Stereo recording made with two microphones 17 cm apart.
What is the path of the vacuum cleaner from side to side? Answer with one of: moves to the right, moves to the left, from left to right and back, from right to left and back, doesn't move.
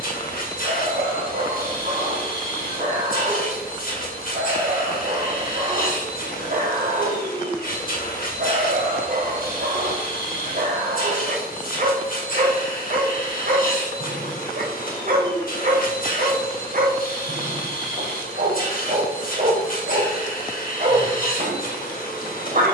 doesn't move.